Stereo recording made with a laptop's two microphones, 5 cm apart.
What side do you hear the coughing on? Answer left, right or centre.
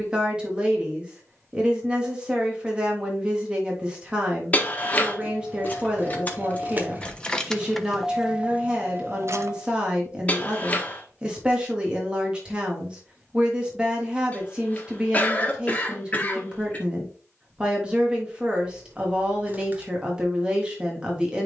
left.